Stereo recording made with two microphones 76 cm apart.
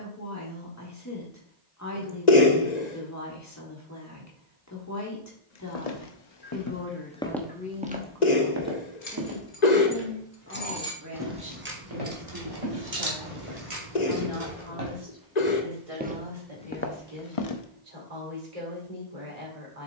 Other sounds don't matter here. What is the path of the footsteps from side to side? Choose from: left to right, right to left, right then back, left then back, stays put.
right then back.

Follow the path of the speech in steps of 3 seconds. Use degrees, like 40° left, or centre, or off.
20° left, 20° left, 10° left, 20° right, 40° right, 50° right, 50° right.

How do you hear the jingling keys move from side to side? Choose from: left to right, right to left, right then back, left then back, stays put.
left to right.